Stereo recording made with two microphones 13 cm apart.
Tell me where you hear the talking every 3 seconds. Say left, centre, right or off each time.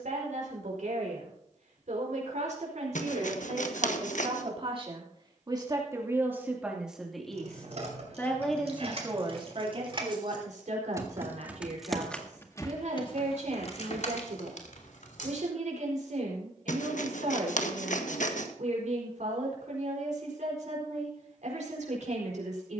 right, right, centre, right, right, right, right, right.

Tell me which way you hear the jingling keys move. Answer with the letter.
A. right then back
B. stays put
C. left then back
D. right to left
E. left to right
D.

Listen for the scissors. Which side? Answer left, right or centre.
left.